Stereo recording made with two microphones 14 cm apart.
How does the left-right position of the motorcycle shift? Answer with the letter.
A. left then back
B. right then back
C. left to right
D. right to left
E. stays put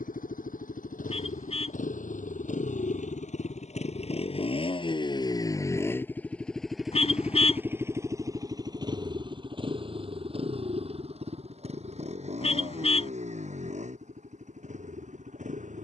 C.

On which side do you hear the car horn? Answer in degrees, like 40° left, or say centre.
50° left.